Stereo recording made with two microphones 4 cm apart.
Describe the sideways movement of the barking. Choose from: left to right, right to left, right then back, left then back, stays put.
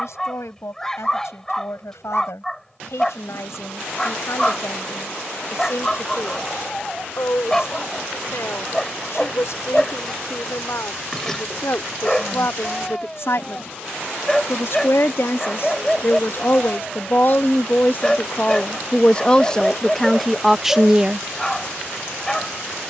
stays put.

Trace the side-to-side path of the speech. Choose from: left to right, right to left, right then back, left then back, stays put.
left to right.